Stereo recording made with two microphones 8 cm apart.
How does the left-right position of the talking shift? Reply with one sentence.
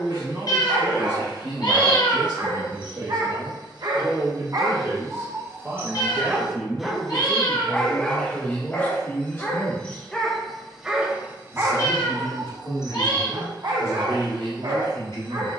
You can hear the talking go from the right side to the left.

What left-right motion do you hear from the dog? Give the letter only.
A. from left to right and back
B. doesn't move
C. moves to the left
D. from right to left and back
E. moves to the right
D.